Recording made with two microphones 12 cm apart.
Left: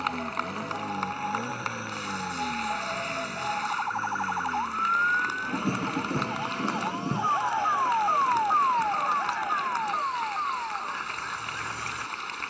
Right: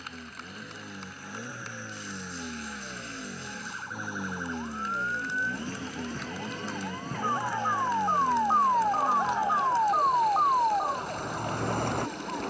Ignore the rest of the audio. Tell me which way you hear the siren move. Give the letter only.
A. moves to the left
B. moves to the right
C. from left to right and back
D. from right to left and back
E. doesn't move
B.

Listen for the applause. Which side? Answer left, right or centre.
left.